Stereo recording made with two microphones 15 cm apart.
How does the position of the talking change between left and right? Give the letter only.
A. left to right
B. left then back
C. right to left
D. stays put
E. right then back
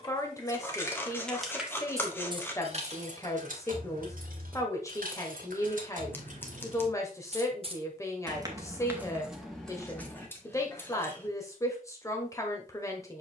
D.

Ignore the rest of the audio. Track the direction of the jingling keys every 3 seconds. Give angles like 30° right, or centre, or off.
centre, 70° right, 40° right, 10° left, off.